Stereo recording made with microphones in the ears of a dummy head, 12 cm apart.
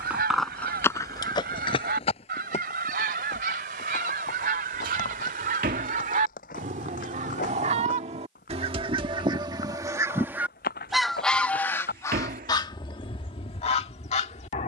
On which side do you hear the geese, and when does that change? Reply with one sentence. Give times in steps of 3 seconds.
You can hear the geese on the right from 0 s, in the centre from 9 s and on the left from 12 s.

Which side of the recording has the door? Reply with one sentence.
In this clip you hear the door on the right.